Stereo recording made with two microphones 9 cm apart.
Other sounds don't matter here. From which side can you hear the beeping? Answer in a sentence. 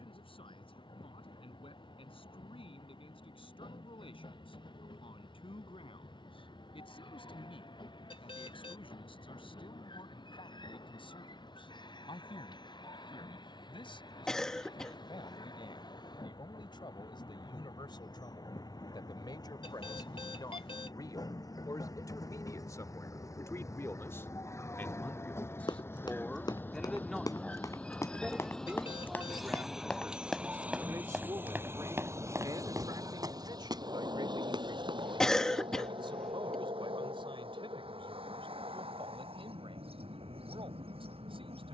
You can hear the beeping on the left.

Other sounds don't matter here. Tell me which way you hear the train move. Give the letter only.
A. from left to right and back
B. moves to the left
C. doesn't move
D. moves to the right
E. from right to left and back
D.